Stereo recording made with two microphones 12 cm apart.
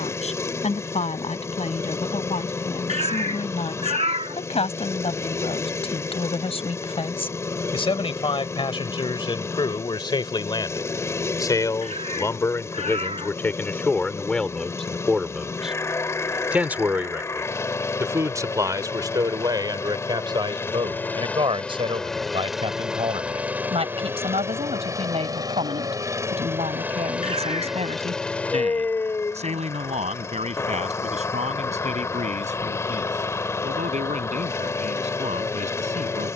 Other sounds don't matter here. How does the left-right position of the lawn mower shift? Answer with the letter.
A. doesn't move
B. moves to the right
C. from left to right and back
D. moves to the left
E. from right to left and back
C.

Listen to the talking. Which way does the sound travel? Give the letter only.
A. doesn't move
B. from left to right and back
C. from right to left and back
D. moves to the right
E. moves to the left
D.